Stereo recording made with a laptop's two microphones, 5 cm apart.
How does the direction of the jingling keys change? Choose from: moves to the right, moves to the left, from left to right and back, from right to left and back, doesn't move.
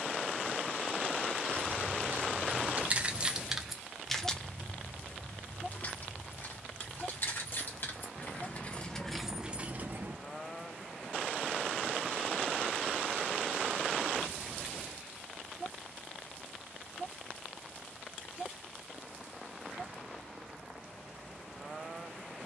from right to left and back.